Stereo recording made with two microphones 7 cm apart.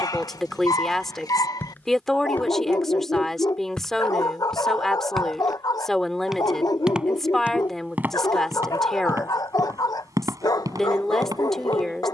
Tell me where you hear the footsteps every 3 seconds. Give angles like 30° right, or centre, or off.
20° left, 10° left, 20° right, 50° right.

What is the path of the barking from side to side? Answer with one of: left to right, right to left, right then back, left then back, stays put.
stays put.